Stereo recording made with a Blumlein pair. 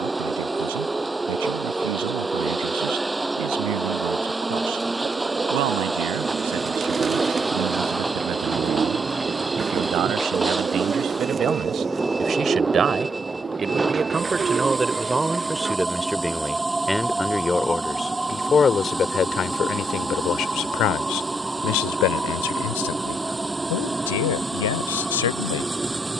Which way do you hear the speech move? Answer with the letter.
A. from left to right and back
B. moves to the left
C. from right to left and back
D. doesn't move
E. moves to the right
B.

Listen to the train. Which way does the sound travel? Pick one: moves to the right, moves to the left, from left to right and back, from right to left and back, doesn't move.
doesn't move.